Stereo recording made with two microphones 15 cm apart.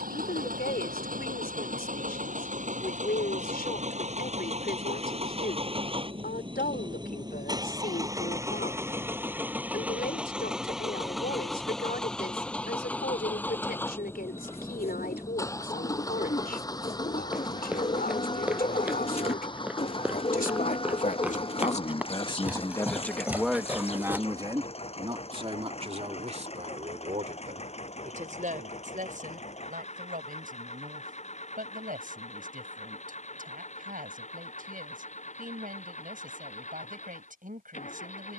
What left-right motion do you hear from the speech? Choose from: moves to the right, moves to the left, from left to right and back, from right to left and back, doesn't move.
moves to the right.